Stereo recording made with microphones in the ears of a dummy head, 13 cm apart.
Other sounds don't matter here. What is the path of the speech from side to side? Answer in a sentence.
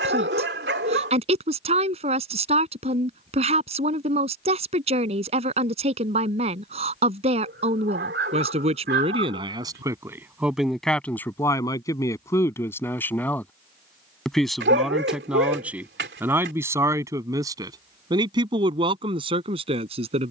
You can hear the speech move from right to left and back again.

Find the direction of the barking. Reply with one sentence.
In this clip you hear the barking on the right.